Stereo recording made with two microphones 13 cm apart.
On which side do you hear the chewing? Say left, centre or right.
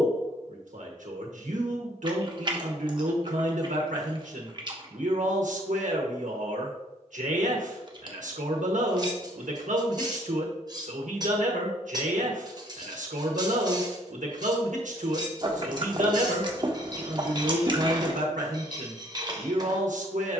right.